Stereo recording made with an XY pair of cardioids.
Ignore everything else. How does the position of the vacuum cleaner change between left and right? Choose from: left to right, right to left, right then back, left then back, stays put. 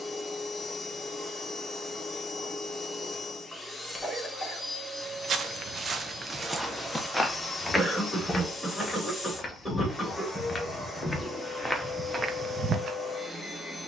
stays put.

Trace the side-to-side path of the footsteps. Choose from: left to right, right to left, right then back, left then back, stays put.
left then back.